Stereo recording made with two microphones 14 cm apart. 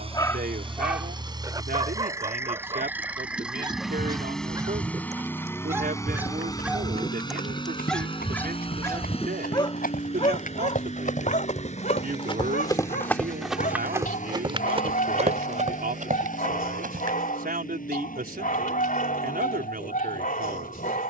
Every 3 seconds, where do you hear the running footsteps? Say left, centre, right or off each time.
off, off, left, left, centre, right, off.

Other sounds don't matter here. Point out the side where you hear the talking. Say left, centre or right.
right.